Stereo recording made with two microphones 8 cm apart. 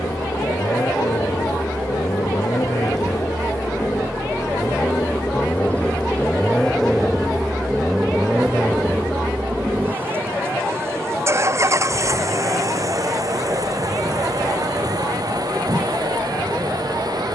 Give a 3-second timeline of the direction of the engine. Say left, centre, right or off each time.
left, left, centre, right, right, right.